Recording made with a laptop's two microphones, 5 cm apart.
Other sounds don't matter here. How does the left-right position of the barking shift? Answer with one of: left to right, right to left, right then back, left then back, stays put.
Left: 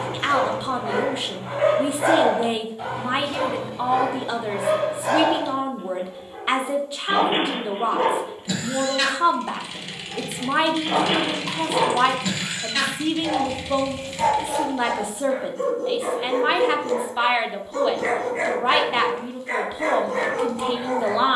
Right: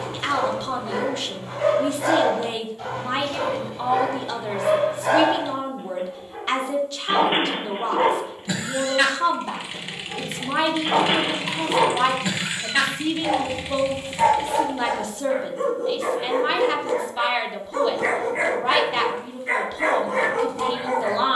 left to right.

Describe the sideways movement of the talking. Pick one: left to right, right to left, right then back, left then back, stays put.
stays put.